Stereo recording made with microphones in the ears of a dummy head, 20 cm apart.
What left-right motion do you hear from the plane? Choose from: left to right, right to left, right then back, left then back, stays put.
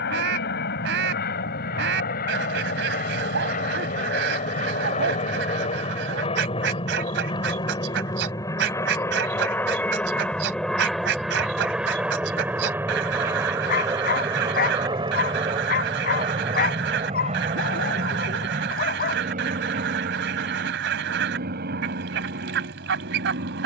left to right.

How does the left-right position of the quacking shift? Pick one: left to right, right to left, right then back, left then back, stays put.
stays put.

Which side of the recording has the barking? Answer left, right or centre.
left.